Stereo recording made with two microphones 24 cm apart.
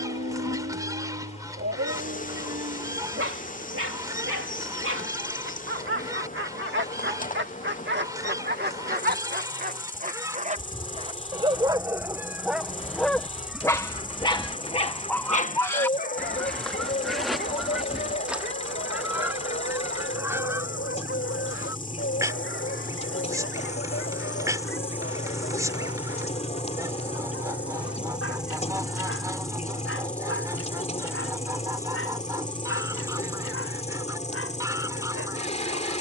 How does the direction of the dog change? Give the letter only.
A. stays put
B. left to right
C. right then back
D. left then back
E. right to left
E.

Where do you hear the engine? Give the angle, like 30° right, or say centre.
30° left.